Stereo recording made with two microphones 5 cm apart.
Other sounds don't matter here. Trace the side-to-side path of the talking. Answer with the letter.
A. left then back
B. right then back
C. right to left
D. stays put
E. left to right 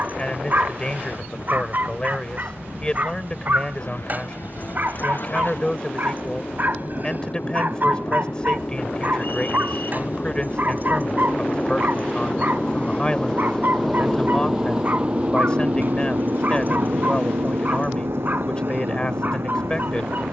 D.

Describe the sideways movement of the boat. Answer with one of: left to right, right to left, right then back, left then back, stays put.
left to right.